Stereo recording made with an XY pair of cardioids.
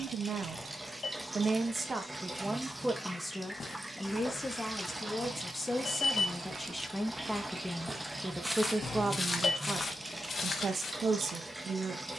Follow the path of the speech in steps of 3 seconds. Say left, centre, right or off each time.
right, centre, centre, right.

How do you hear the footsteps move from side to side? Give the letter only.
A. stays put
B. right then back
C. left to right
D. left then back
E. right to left
B.